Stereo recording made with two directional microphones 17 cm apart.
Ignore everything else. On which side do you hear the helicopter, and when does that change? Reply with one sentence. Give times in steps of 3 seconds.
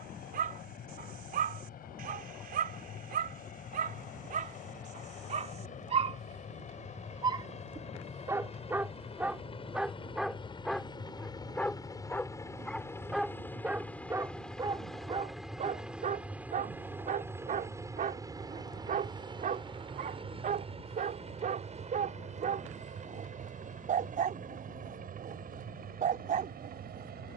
In this clip you hear the helicopter on the left from 0 s, in the centre from 12 s and on the right from 18 s.